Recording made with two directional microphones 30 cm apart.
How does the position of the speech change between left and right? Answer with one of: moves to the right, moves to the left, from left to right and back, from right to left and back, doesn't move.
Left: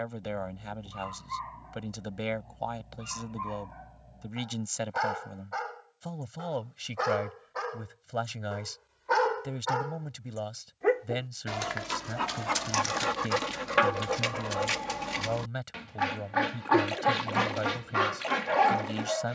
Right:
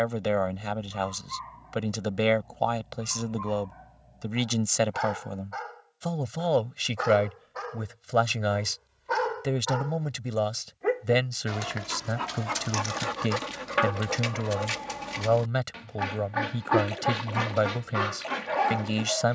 doesn't move.